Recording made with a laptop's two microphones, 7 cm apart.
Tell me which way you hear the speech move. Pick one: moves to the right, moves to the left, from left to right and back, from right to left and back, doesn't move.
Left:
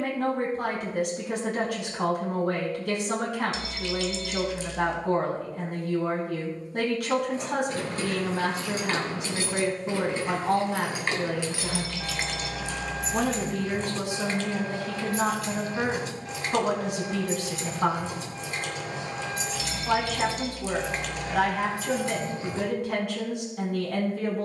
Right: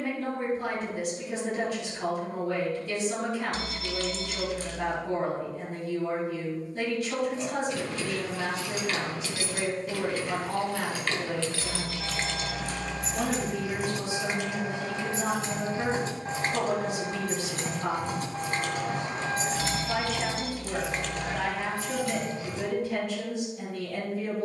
doesn't move.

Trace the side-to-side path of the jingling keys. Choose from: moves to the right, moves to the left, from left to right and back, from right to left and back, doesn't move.
from left to right and back.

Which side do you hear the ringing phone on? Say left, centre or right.
right.